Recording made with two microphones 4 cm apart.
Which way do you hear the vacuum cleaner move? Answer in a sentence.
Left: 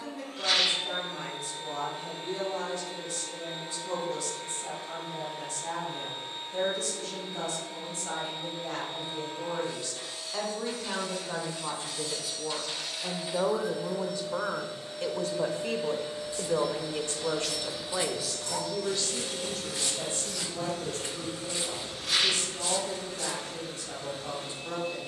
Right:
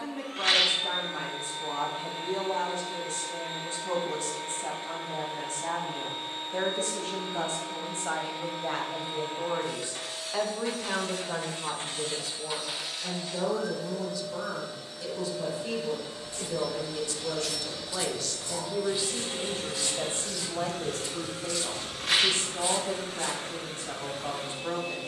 You can hear the vacuum cleaner move from right to left and back again.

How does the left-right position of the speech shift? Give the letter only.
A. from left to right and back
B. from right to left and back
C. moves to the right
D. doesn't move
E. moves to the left
B.